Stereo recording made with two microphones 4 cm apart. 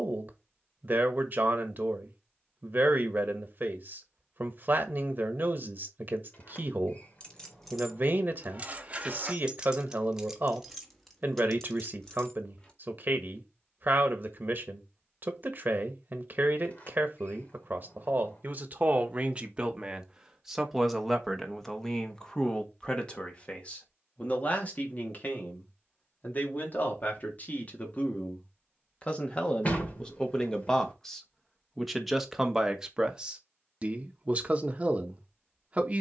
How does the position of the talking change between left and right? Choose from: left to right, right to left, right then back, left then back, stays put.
left then back.